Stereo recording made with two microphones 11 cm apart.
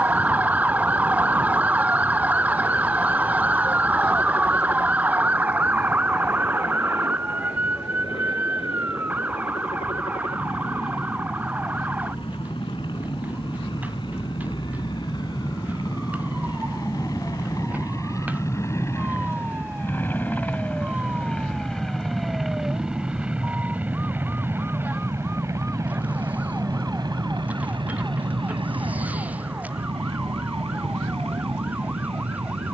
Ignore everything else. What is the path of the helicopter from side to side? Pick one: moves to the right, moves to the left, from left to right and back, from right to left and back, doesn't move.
moves to the right.